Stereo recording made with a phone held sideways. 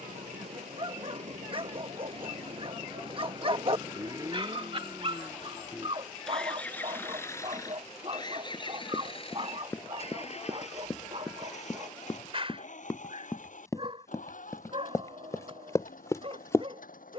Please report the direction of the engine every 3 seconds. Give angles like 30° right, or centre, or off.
50° right, 20° right, 20° left, 50° left, 60° left, 70° left.